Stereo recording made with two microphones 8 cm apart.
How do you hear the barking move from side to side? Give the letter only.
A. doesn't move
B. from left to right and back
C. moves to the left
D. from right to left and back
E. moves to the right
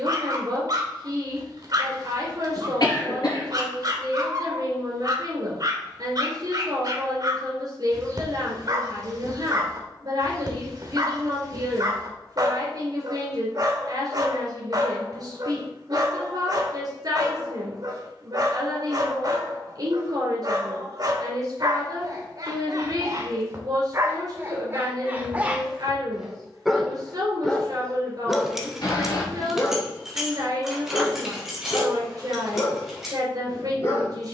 C.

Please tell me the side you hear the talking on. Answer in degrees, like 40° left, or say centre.
50° right.